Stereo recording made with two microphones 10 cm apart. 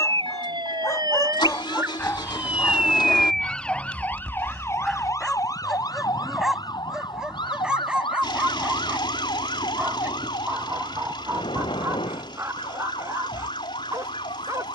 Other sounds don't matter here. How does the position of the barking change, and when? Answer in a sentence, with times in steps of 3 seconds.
You can hear the barking on the left from 0 s, in the centre from 3 s and on the right from 9 s.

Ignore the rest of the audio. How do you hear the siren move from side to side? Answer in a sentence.
In this clip you hear the siren go from the right side to the left.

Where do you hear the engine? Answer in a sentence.
You can hear the engine on the left.